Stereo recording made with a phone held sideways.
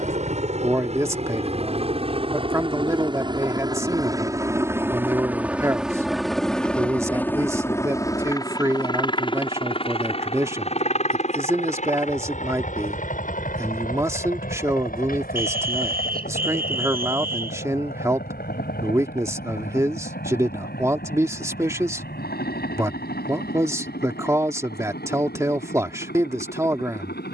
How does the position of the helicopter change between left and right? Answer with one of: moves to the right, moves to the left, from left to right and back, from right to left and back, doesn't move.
moves to the left.